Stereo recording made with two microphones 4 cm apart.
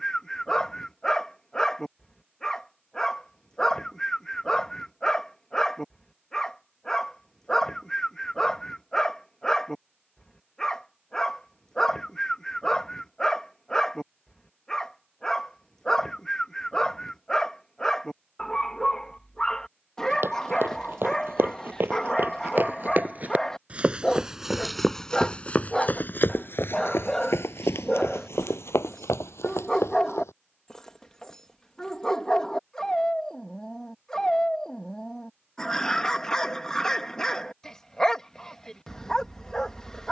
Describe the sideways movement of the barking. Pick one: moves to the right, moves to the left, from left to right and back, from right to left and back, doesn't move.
doesn't move.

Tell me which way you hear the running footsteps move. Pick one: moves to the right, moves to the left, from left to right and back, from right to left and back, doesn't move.
moves to the left.